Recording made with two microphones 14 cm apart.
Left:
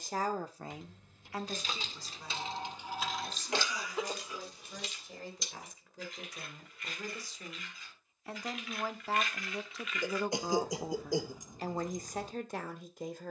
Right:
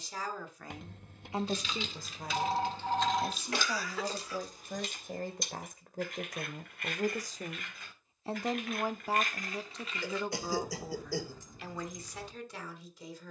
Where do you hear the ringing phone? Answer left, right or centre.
right.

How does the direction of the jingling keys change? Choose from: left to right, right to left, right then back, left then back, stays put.
right then back.